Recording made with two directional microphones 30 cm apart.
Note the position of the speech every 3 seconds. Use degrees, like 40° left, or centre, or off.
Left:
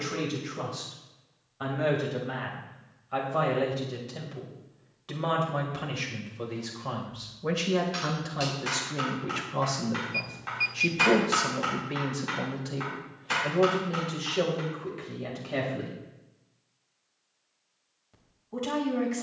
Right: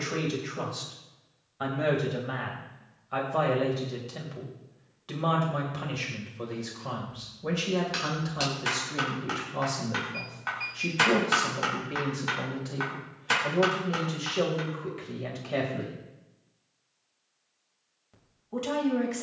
20° right, centre, 10° left, 20° left, 10° left, 10° right, 20° right.